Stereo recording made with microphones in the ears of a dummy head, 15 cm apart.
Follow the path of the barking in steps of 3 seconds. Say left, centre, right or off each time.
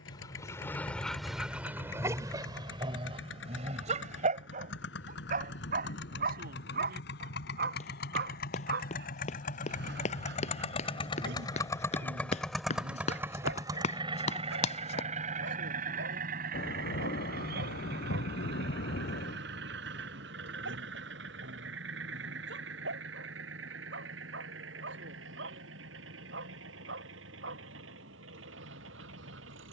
centre, right, right, right, right, right, right, right, right, right.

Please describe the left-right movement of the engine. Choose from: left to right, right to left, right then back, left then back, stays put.
left to right.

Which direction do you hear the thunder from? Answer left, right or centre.
left.